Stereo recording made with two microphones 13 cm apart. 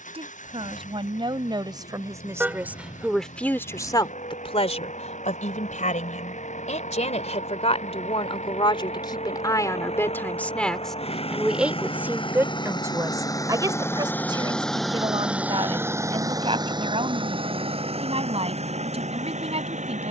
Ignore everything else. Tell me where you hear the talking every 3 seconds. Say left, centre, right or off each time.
right, left, left, centre, right, right, right.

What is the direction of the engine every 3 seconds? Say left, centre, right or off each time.
left, left, left, left, left, right, right.